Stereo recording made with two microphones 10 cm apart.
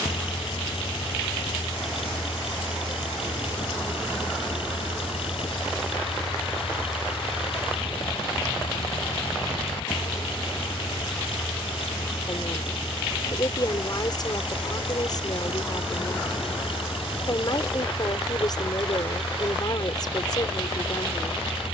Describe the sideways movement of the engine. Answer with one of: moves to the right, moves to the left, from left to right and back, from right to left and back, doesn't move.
doesn't move.